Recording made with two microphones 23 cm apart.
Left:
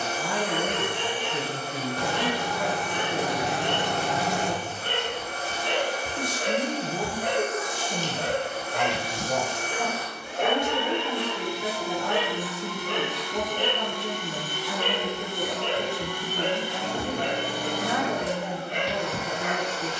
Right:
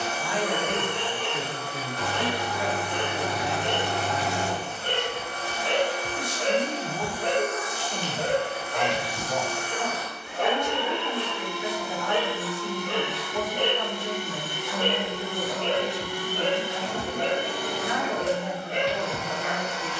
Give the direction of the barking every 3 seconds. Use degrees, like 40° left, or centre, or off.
60° right, 50° right, 20° right, 20° left, 10° right, 50° right, 50° right.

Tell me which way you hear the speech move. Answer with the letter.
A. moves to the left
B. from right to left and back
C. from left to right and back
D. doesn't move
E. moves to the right
D.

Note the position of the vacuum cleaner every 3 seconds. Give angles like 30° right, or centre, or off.
40° left, 40° left, 40° left, 40° left, 10° right, 40° right, centre.